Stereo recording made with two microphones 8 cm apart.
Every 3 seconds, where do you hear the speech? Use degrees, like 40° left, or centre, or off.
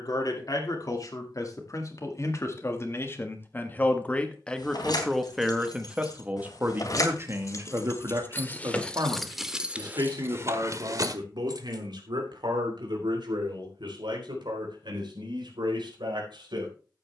40° left, 10° left, 40° right, 60° right, 70° right, 80° right.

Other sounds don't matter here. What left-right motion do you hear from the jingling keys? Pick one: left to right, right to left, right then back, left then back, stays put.
left to right.